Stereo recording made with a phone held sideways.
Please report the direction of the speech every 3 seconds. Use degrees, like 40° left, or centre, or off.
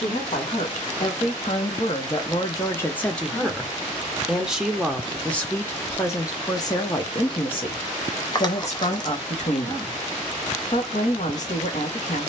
50° left, centre, 40° left, 60° left.